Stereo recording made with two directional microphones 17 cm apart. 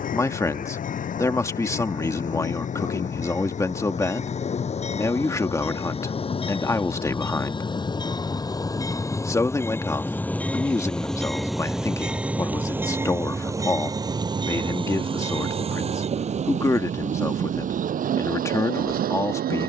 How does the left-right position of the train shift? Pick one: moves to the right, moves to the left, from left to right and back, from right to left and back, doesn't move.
moves to the right.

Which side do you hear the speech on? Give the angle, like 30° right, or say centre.
20° left.